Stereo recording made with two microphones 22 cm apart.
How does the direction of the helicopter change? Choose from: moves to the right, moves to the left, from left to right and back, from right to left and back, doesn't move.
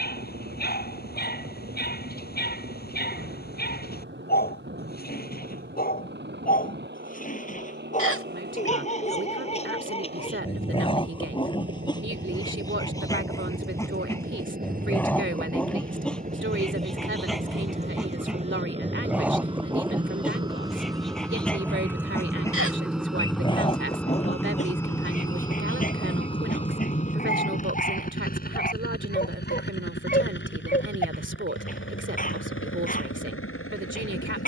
moves to the left.